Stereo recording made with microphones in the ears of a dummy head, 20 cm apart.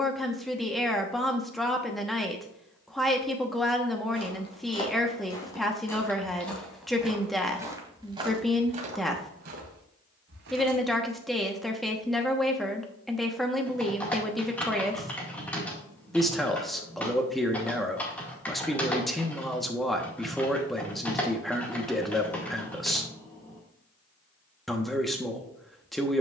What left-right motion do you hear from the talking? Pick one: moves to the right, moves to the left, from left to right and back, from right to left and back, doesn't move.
doesn't move.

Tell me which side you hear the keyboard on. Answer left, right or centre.
centre.